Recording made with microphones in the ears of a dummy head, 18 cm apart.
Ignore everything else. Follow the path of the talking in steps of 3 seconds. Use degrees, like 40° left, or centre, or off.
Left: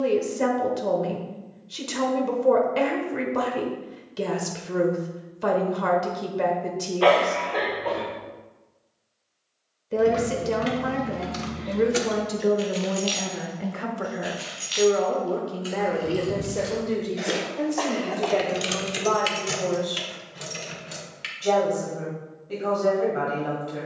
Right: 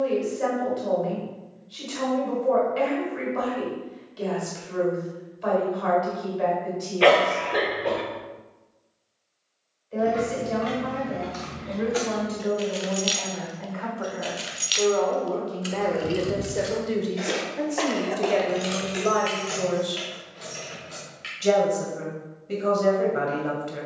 60° left, 60° left, 60° left, 60° left, 40° left, centre, 30° right, 30° right.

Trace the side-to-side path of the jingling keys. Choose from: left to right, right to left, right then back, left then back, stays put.
right then back.